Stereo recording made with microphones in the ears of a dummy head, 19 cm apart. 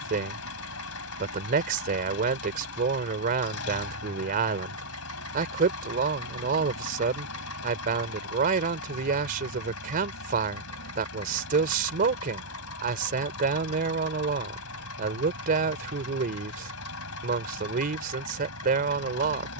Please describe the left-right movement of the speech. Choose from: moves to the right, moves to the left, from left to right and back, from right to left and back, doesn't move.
doesn't move.